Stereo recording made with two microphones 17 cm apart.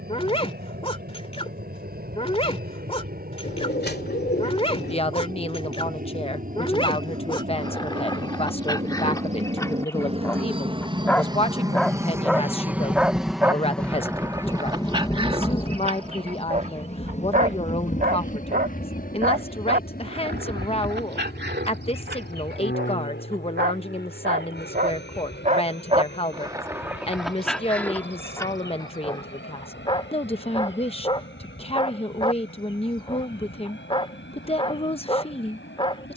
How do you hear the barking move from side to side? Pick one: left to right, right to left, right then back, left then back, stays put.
right then back.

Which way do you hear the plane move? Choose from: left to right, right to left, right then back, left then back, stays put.
right to left.